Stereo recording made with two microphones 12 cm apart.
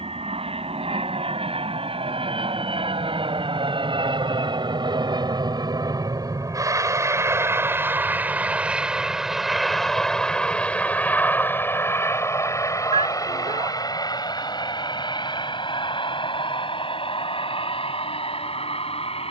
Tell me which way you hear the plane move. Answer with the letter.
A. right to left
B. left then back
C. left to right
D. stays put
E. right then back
A.